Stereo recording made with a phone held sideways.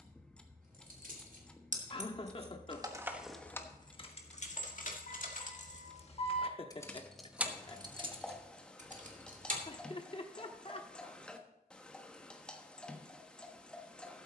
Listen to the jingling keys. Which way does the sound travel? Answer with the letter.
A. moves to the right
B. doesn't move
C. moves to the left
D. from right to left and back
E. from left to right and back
D.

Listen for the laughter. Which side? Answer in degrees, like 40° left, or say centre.
40° left.